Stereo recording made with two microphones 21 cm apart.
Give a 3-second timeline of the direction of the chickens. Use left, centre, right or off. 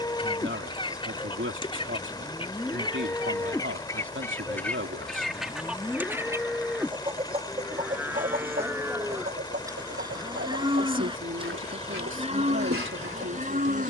left, centre, right, right, right.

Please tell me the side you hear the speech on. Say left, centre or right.
right.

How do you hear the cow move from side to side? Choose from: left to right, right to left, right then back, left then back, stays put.
left to right.